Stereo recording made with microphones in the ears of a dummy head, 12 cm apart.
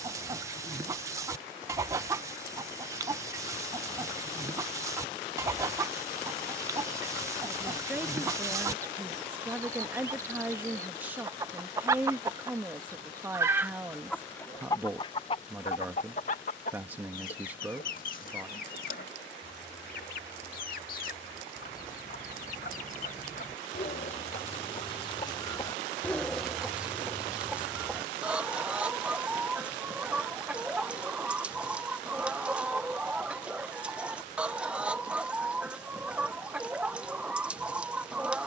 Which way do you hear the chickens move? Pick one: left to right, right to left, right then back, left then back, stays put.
left then back.